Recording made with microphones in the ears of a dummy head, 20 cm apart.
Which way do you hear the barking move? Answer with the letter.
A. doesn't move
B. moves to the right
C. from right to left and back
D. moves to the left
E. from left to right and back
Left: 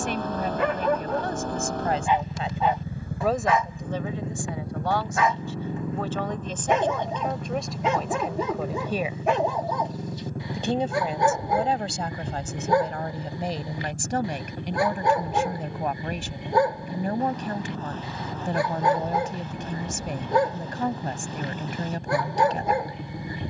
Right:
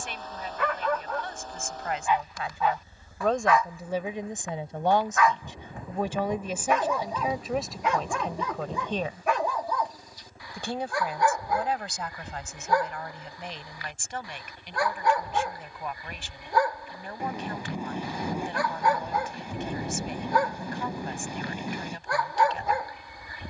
A.